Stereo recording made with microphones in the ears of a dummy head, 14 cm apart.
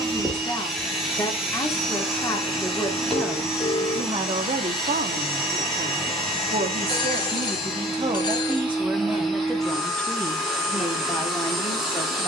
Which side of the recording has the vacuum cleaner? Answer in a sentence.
In this clip you hear the vacuum cleaner in the centre.